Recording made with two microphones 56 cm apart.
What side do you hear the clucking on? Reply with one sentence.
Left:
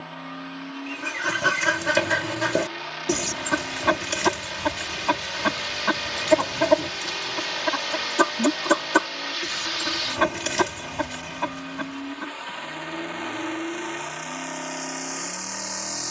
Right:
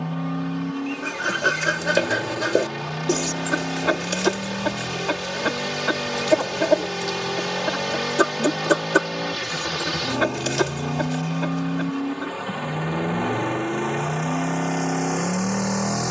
You can hear the clucking on the left.